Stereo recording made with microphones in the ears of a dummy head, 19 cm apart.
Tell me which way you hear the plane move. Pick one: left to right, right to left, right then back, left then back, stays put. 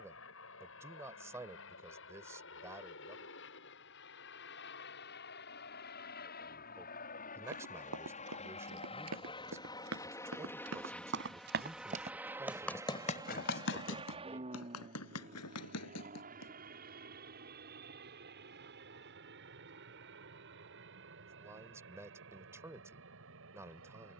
left to right.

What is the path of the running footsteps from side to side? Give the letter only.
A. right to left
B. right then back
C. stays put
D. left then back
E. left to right
A.